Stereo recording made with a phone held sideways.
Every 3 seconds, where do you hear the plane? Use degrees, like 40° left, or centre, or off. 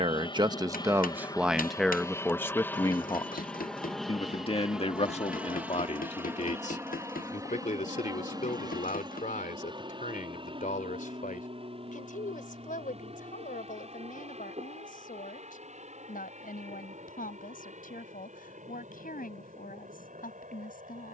20° left, centre, 20° right, 30° right, 40° right, 40° right, 50° right.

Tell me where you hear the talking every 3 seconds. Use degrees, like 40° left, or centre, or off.
10° right, 40° left, 50° left, 60° left, 60° left, 60° left, 60° left.